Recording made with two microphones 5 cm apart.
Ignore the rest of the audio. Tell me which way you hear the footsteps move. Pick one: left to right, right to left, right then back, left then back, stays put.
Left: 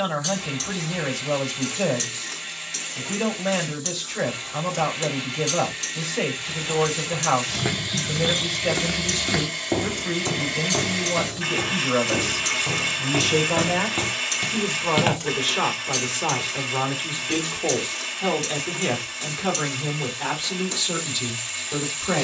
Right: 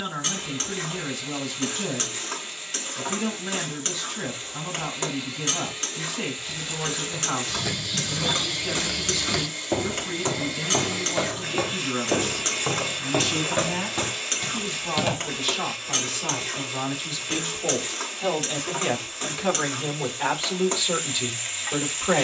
right then back.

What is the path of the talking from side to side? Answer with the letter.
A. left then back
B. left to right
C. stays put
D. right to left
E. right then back
B.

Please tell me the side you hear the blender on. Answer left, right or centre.
left.